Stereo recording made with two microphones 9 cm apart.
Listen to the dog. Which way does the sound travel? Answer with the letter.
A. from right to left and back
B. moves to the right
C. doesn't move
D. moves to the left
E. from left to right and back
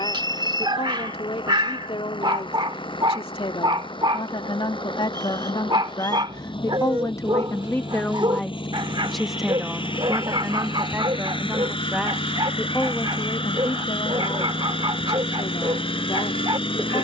C.